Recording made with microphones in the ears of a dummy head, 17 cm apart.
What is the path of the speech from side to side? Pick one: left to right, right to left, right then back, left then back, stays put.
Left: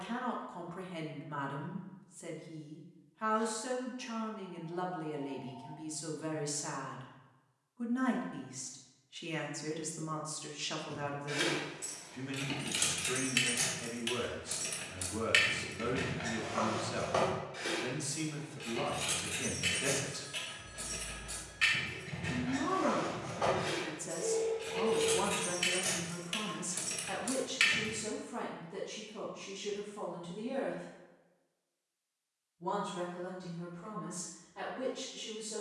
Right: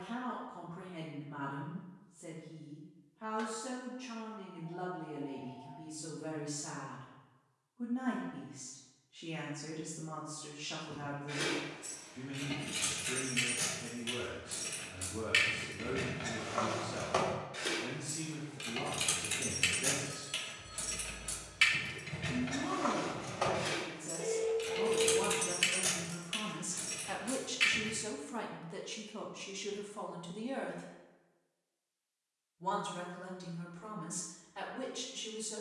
left to right.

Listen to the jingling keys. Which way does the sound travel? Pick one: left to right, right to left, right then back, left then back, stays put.
right then back.